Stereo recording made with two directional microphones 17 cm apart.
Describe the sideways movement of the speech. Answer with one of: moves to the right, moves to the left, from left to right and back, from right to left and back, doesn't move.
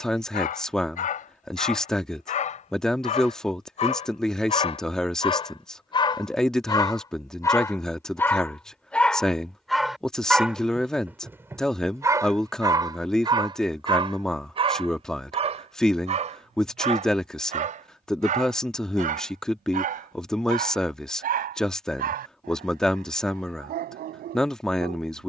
doesn't move.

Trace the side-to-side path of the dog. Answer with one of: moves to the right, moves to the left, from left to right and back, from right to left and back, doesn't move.
moves to the right.